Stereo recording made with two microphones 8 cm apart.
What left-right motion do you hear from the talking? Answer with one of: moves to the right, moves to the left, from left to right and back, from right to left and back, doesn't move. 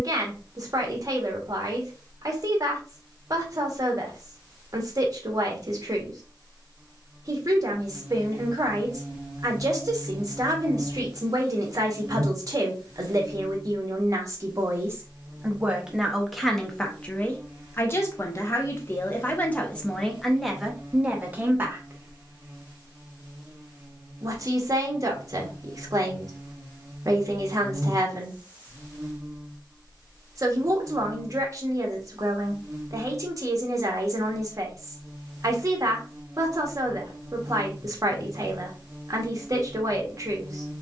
from right to left and back.